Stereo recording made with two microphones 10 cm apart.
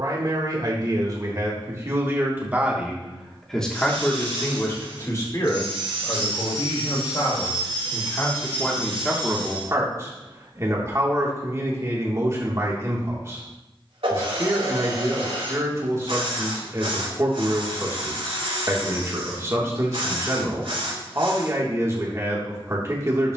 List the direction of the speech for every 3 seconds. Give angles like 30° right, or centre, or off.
30° right, 30° left, 40° left, 30° right, 30° right, 30° right, 30° right, 30° right.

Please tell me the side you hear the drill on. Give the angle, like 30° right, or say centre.
80° right.